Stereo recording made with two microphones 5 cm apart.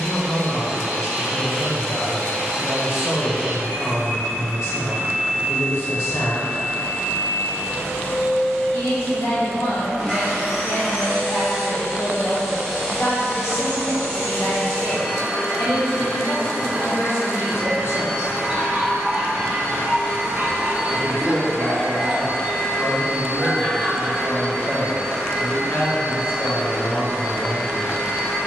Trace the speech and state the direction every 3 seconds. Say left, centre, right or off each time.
left, left, left, left, left, left, left, centre, left, left.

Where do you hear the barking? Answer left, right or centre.
right.